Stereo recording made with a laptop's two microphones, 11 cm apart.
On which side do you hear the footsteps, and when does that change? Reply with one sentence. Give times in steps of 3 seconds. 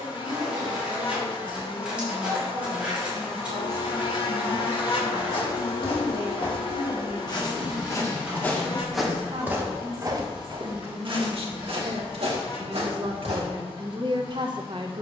You can hear the footsteps not at all from 0 s, on the left from 3 s and on the right from 9 s.